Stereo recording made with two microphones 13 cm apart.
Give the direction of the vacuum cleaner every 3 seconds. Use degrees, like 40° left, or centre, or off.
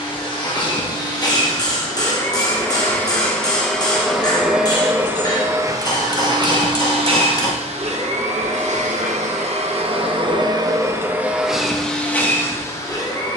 30° left, 10° right, 50° right, 30° right, 20° left.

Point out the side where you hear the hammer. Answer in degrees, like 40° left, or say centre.
30° left.